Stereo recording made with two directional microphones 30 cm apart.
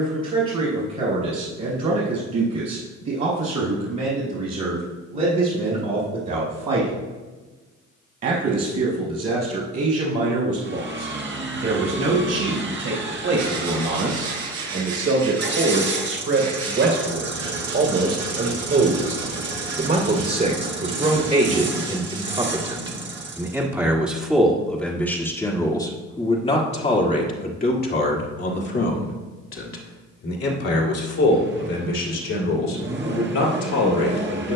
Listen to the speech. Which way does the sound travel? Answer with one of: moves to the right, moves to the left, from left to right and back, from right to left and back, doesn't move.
moves to the left.